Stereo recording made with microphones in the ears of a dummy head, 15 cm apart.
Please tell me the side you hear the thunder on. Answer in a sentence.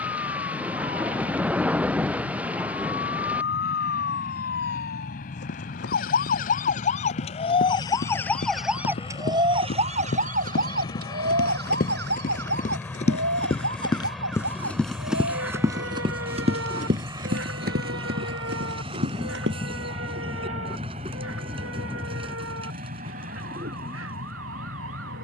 In this clip you hear the thunder in the centre.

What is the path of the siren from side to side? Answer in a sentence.
You can hear the siren move from left to right.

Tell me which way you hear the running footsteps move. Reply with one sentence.
You can hear the running footsteps move from left to right.